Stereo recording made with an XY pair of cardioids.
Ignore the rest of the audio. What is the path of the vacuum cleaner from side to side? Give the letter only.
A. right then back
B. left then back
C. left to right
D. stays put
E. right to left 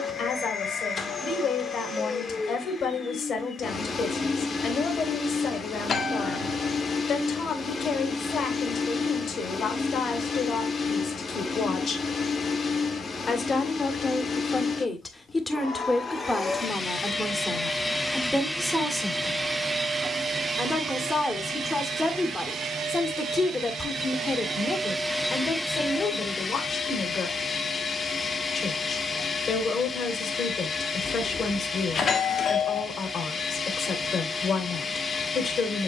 A.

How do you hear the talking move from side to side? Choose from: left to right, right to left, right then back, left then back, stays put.
right then back.